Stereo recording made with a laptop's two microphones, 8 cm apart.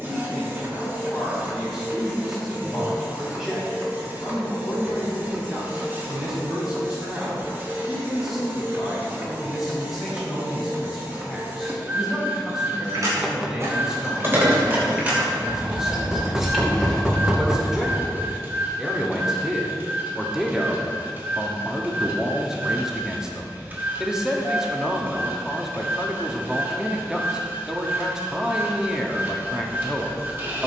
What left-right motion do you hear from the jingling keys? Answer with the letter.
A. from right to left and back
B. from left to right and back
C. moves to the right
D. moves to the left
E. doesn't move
D.